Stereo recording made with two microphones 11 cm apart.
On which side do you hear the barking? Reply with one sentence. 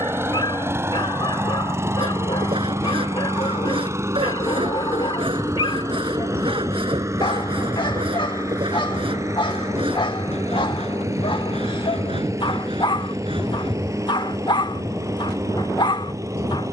You can hear the barking on the left.